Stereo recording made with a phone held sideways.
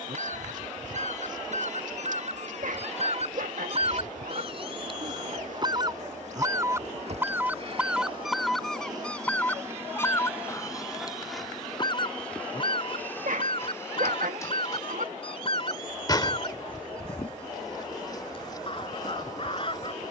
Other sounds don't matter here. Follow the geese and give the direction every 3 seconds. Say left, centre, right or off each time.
right, right, centre, left, left, left, left.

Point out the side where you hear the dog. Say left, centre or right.
right.